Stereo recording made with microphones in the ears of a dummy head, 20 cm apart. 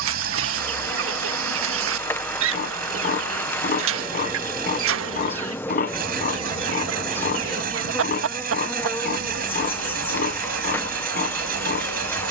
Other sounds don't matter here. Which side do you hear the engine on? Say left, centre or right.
right.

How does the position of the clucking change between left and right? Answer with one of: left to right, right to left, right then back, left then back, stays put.
stays put.